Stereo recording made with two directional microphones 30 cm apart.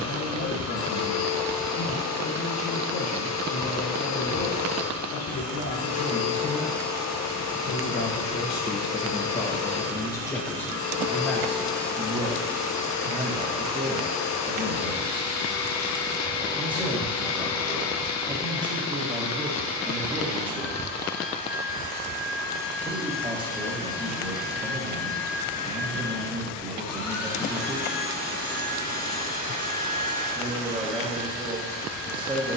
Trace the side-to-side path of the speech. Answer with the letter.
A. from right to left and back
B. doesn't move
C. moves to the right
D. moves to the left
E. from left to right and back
C.